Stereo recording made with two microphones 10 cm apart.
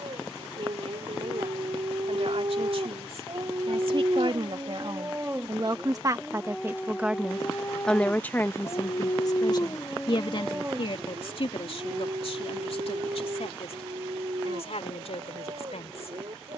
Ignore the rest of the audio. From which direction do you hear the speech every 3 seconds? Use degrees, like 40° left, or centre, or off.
70° right, 50° right, centre, 50° left, 70° left, 70° left.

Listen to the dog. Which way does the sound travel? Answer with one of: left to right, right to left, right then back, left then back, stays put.
left then back.